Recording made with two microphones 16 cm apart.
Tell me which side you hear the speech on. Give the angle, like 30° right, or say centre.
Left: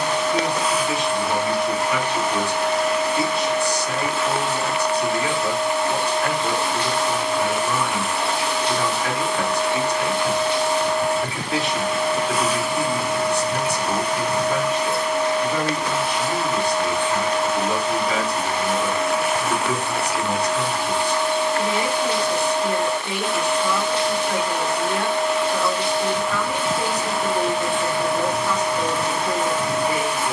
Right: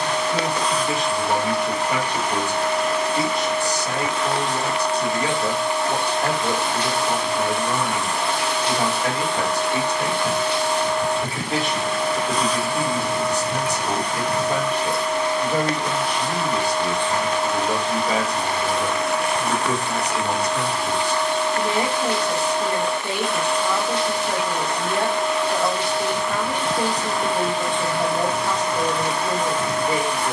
40° right.